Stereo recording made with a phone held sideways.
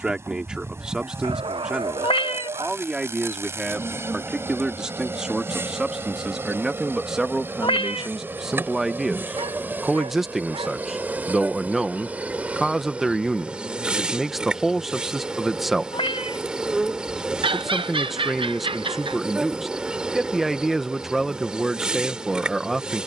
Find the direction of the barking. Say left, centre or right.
right.